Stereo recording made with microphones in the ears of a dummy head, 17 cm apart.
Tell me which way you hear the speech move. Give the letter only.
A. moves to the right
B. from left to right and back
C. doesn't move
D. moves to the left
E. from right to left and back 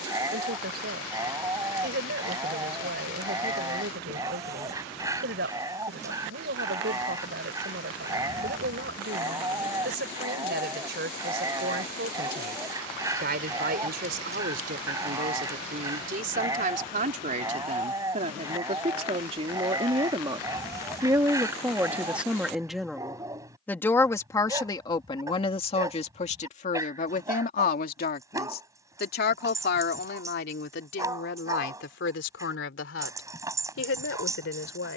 D.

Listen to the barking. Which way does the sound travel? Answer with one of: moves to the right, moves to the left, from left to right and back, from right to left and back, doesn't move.
doesn't move.